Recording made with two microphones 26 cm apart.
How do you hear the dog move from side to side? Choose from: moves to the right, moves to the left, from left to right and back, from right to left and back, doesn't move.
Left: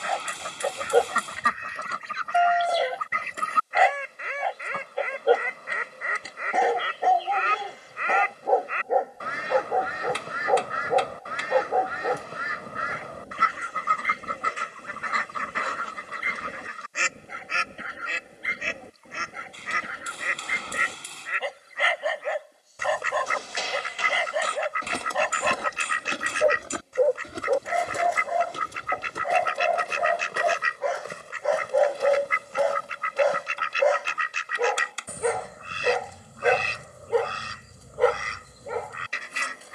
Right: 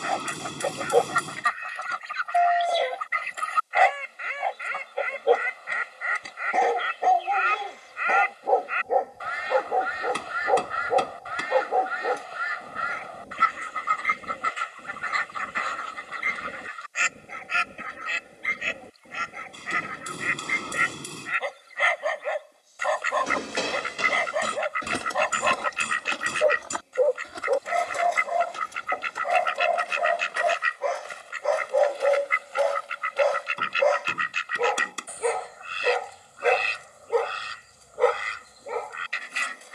doesn't move.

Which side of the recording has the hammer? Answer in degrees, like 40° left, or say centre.
50° right.